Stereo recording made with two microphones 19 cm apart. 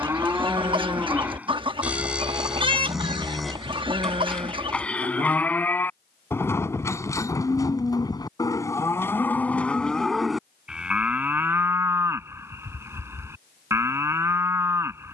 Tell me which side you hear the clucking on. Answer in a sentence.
You can hear the clucking on the right.